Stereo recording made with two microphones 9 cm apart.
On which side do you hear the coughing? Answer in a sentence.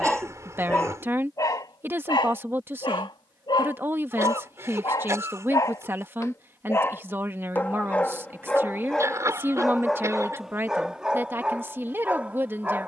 You can hear the coughing on the right.